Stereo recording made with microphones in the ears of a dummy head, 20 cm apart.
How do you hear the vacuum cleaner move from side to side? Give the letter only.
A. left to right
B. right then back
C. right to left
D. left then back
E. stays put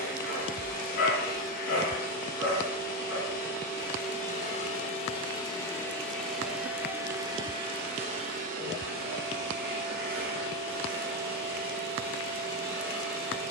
A.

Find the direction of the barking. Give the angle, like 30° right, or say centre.
60° left.